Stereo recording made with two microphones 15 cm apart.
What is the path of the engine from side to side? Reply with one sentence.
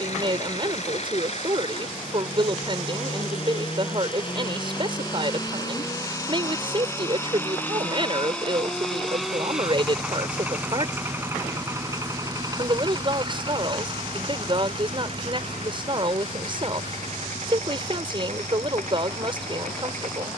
In this clip you hear the engine move to the right.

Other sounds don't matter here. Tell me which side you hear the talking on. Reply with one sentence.
In this clip you hear the talking on the right.